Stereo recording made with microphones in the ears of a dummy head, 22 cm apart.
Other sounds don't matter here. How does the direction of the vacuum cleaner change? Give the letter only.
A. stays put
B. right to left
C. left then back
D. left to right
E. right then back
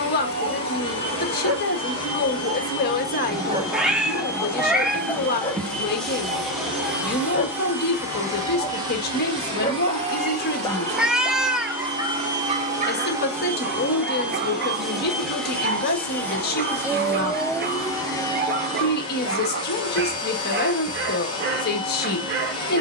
E.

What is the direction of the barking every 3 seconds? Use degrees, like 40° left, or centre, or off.
50° right, centre, 30° left, 10° left, 40° right, 40° right, 40° right, 40° right.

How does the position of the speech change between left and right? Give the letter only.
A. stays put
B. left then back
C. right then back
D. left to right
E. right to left
A.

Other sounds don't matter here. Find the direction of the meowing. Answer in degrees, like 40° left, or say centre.
centre.